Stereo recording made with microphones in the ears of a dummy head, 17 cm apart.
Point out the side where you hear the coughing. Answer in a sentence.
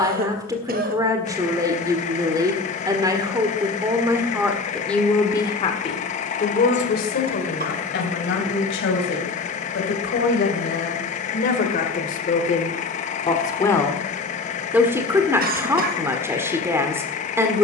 In this clip you hear the coughing on the right.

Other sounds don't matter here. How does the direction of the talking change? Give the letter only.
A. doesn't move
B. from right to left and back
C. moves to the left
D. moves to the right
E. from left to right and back
B.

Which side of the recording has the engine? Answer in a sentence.
In this clip you hear the engine on the left.